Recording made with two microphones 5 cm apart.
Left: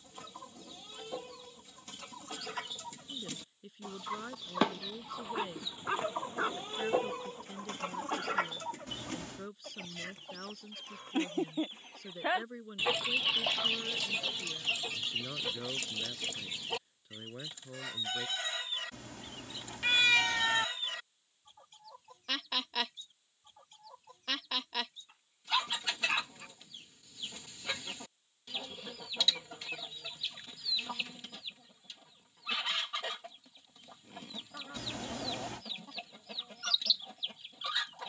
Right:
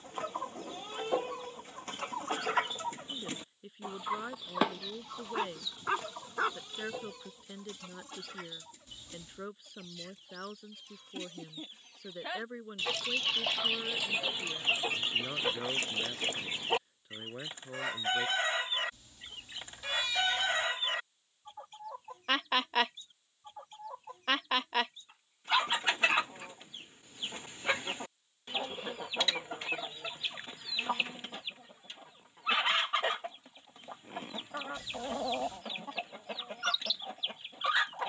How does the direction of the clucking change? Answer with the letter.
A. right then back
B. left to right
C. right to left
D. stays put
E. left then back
E.